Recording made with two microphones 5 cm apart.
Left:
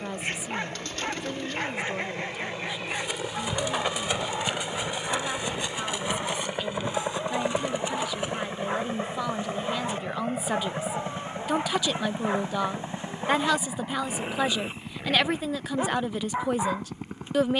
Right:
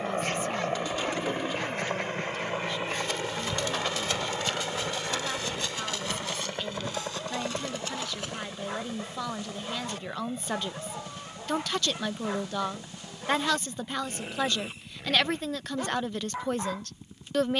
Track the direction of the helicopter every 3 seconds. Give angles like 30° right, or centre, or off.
40° right, 10° right, 20° left, 40° left, 50° left, 60° left.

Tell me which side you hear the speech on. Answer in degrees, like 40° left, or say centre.
10° left.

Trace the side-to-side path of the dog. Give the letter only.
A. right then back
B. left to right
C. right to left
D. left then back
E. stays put
E.